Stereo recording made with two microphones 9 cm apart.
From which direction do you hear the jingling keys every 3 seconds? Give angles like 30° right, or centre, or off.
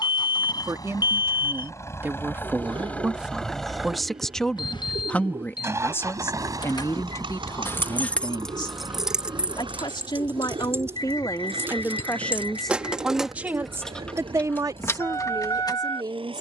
off, off, 20° left, 20° right, centre, 40° left.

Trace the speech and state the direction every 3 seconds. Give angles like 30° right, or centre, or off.
20° right, 10° left, 40° left, 50° left, 10° right, 50° right.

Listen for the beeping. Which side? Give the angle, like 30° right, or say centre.
60° left.